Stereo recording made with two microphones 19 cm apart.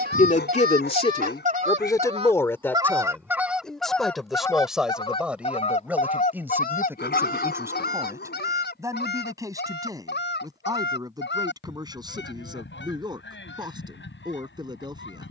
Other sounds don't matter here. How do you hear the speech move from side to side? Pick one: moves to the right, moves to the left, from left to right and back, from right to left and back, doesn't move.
moves to the right.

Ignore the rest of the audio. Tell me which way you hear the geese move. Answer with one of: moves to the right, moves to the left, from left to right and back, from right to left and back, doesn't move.
moves to the left.